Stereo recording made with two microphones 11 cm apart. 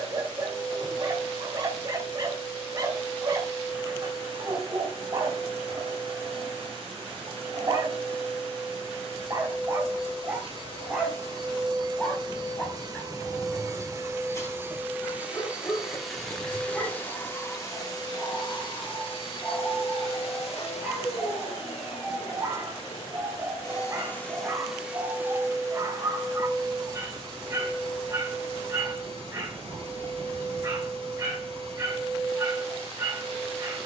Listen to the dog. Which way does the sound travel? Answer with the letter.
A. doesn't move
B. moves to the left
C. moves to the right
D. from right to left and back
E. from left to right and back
D.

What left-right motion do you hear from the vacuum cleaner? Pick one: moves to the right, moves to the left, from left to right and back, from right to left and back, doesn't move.
from right to left and back.